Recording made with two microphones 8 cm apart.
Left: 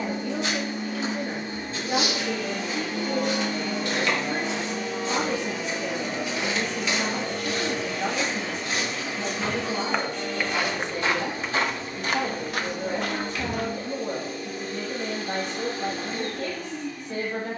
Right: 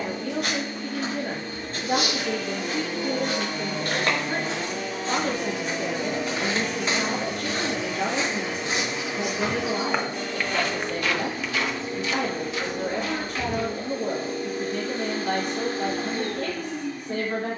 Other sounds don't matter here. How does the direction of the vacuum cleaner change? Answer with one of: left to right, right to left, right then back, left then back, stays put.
left to right.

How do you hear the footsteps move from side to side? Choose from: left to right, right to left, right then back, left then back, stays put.
right to left.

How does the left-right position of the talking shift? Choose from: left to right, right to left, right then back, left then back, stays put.
stays put.